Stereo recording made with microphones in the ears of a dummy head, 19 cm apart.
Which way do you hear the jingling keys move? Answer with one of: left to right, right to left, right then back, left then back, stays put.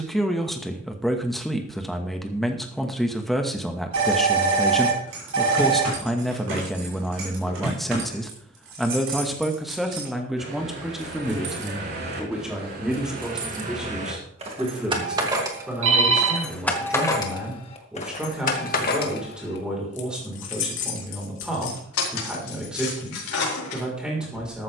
right to left.